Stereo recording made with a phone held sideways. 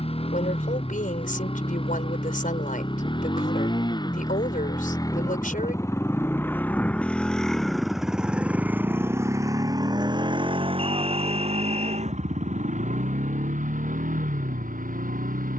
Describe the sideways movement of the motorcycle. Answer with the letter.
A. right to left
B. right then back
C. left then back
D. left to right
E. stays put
D.